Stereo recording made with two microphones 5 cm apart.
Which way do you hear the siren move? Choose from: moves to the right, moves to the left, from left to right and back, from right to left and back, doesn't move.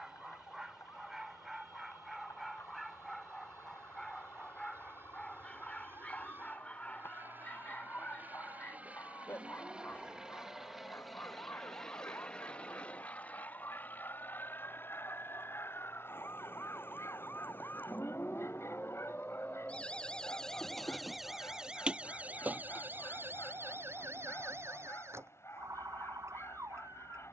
moves to the right.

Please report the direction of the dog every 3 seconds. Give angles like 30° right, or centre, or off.
10° right, 10° left, 30° left, 40° left, 60° left, 60° left, 70° left, 70° left, 70° left.